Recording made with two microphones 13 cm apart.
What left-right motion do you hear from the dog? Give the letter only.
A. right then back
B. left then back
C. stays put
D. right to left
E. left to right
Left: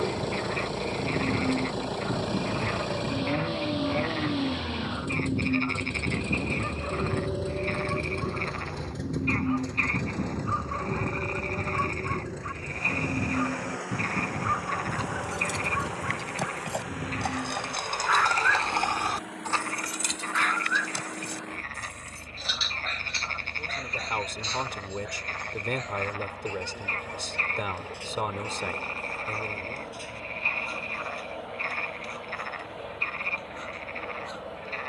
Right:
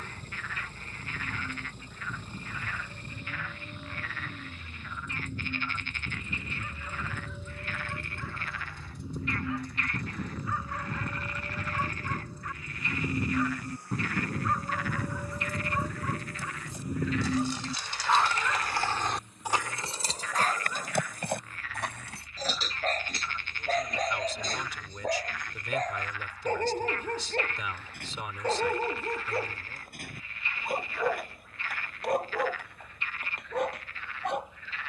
E.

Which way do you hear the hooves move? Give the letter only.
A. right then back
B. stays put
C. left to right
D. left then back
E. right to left
C.